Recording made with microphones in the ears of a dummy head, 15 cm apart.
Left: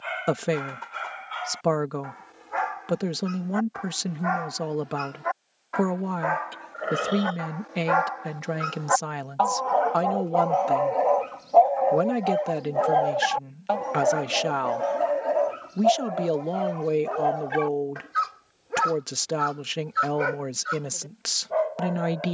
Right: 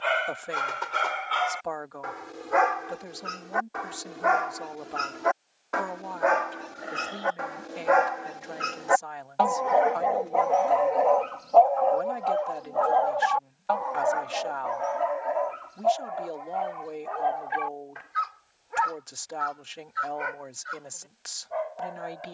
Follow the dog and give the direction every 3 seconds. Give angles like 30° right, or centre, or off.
70° right, 60° right, 40° right, centre, 30° left, 50° left, 60° left, 60° left.